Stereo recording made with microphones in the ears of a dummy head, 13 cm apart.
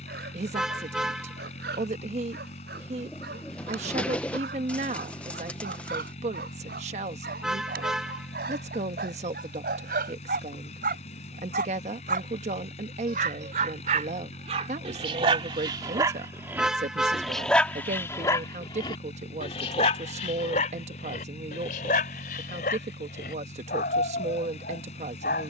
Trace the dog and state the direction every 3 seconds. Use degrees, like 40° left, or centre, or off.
80° right, 80° right, 70° right, 70° right, 50° right, 20° right, 40° left, 60° left, 70° left.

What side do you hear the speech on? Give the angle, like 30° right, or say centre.
50° right.